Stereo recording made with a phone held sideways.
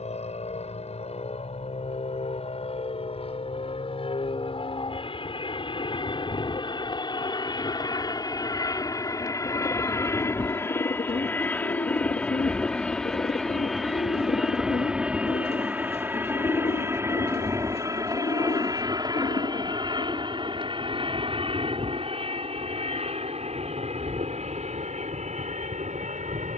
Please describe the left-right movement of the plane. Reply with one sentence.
You can hear the plane go from the left side to the right.